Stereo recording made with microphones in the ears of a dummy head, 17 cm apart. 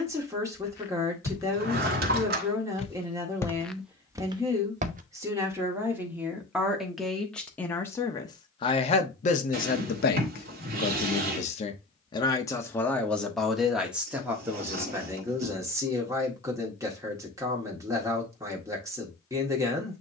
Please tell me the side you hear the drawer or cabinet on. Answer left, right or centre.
right.